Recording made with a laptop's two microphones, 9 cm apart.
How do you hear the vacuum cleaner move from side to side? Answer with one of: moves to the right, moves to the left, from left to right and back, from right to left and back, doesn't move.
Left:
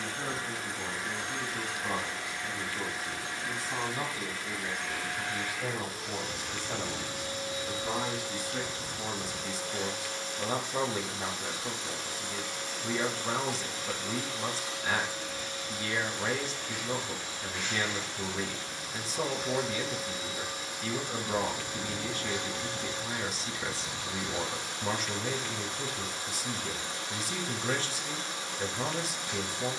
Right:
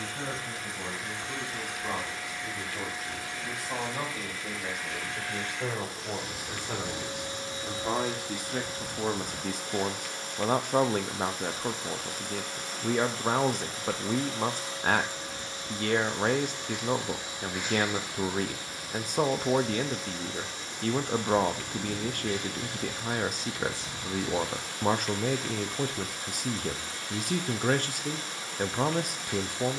from left to right and back.